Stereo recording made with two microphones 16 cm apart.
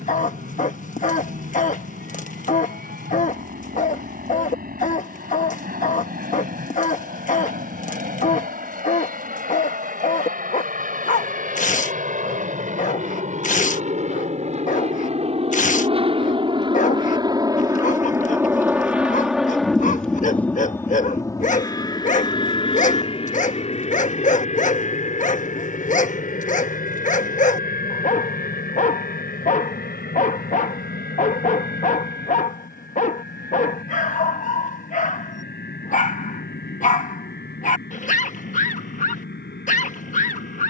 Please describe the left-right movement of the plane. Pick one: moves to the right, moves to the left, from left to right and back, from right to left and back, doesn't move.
moves to the left.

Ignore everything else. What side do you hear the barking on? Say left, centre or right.
left.